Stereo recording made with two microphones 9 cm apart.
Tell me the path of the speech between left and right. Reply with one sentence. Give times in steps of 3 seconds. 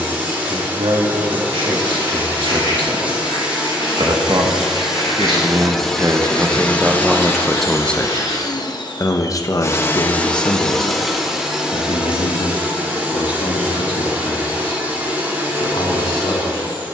In this clip you hear the speech on the right from 0 s, in the centre from 6 s and on the left from 9 s.